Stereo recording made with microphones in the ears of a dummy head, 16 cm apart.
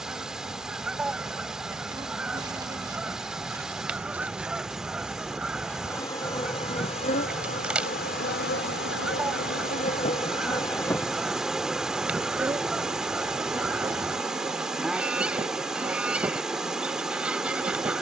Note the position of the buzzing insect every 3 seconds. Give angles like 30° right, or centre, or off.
20° right, centre, 40° left, 30° left, 20° right, 20° right.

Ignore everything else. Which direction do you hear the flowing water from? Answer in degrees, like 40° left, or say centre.
centre.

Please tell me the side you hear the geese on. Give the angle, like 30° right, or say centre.
10° right.